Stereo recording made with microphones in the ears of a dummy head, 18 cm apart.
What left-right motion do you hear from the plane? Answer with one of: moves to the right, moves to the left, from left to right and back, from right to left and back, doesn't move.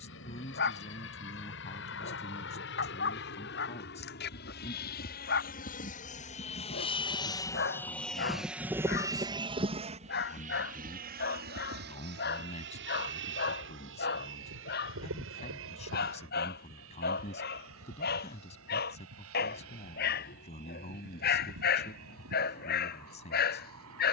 moves to the right.